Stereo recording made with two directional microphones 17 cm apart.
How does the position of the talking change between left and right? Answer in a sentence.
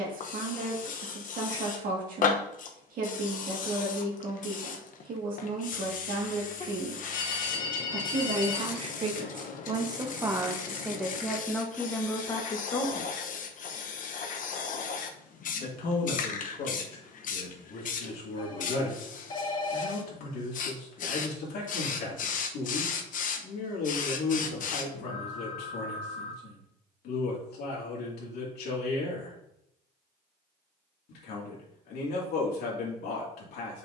You can hear the talking travel towards the left.